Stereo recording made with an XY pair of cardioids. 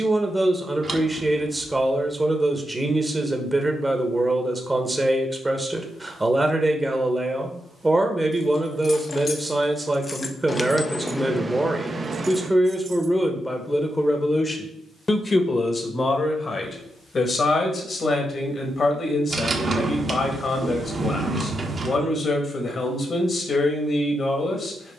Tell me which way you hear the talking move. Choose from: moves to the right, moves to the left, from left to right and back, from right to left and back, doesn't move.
moves to the left.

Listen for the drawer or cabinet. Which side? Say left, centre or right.
right.